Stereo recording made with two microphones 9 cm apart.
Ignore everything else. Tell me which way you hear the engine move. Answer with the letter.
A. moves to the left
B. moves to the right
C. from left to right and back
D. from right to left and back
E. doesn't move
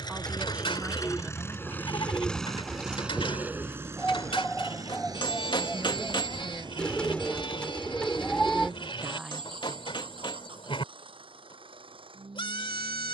B.